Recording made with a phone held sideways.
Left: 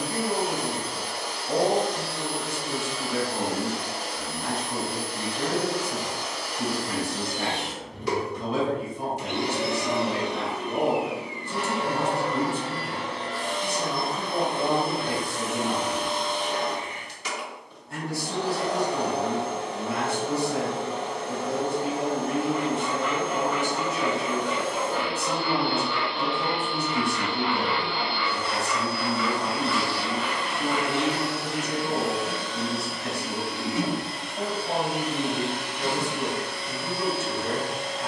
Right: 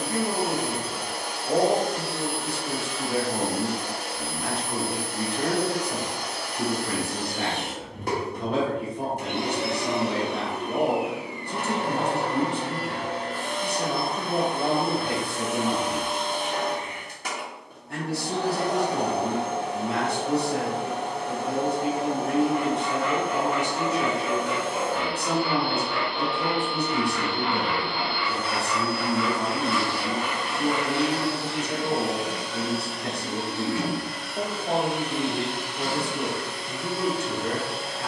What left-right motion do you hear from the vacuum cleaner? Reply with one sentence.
In this clip you hear the vacuum cleaner go from the right side to the left.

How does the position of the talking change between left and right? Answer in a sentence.
In this clip you hear the talking stay put.